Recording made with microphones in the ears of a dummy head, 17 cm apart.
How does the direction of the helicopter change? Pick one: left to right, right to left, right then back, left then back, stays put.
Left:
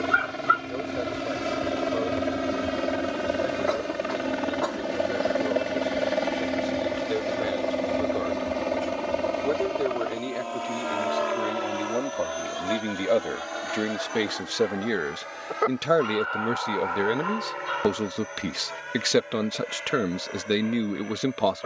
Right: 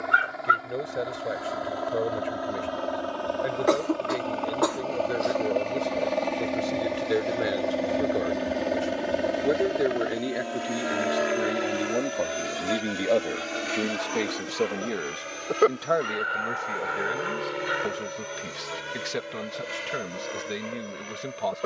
left to right.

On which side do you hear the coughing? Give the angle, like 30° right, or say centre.
60° right.